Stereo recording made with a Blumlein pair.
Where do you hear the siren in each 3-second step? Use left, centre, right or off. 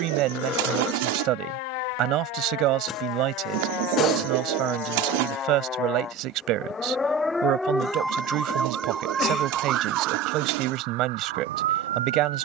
left, left, centre, right.